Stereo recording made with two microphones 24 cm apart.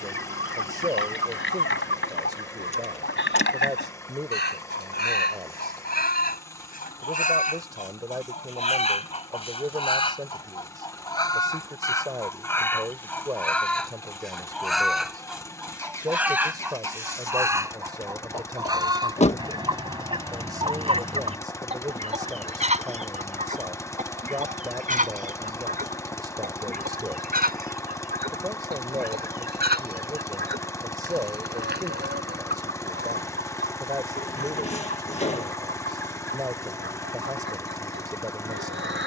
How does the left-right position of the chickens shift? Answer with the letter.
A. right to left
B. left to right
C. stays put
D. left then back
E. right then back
B.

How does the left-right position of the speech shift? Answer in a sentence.
In this clip you hear the speech stay put.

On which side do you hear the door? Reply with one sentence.
In this clip you hear the door on the left.